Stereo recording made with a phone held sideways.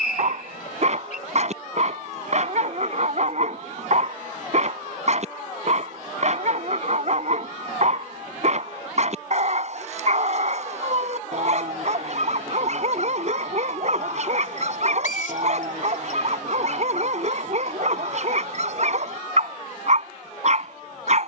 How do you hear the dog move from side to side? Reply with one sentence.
In this clip you hear the dog stay put.